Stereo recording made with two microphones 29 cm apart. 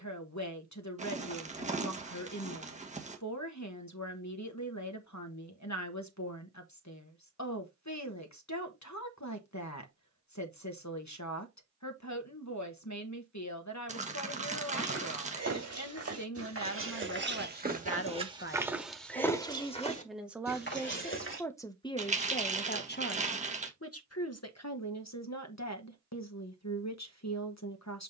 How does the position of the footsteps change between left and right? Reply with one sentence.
You can hear the footsteps move from right to left.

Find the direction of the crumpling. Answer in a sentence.
You can hear the crumpling on the right.